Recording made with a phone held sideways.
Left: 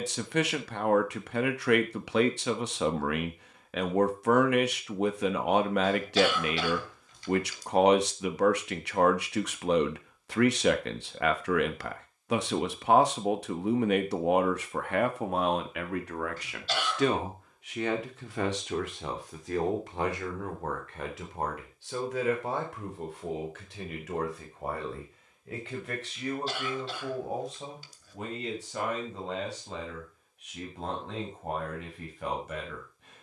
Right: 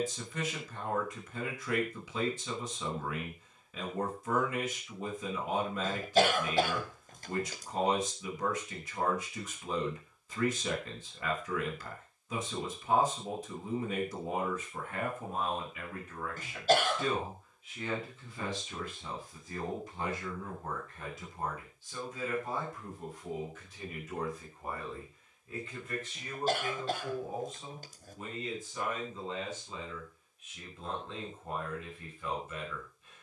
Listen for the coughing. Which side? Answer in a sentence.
In this clip you hear the coughing on the right.